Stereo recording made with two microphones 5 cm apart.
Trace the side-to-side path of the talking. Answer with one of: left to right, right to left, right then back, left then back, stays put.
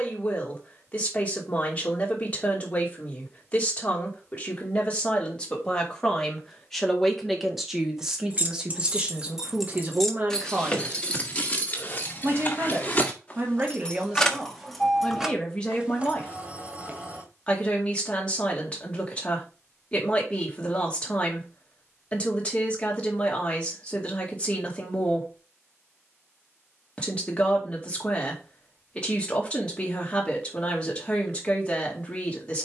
right then back.